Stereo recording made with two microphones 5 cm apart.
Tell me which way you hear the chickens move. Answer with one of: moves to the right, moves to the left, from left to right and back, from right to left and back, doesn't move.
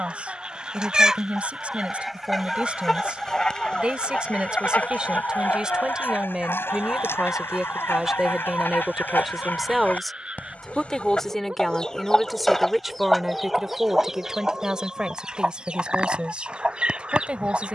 from right to left and back.